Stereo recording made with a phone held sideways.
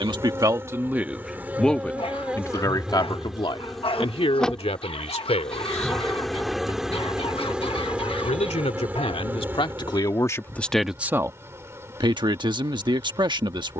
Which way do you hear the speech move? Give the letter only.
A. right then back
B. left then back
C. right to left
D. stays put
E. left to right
B.